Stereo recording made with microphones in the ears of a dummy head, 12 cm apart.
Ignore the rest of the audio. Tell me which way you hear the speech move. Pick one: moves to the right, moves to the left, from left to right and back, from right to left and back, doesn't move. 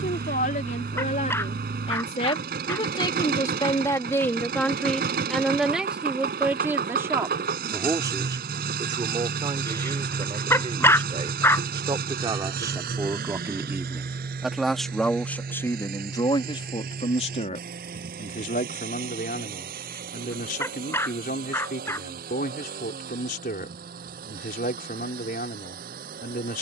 from left to right and back.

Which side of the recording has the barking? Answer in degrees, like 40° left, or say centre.
20° left.